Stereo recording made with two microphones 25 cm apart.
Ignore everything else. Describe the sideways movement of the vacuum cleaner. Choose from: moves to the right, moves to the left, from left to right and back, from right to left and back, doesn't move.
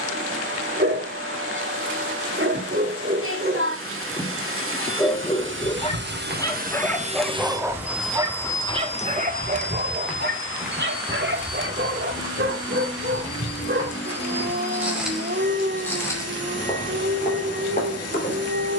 moves to the left.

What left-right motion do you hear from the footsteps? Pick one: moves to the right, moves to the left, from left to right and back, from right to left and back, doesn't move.
from left to right and back.